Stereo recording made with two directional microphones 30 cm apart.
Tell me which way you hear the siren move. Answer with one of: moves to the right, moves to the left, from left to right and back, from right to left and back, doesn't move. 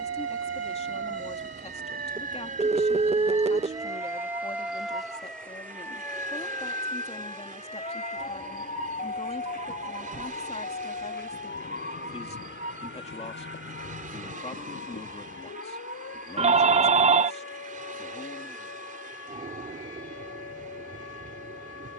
moves to the left.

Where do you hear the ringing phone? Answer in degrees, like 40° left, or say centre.
20° right.